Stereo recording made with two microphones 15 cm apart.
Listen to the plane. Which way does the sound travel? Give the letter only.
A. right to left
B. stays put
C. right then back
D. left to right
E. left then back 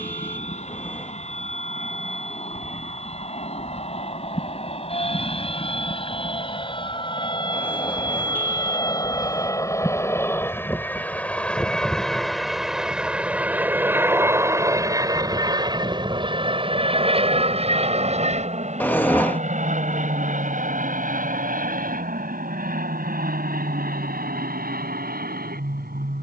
D.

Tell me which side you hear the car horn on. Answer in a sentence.
You can hear the car horn in the centre.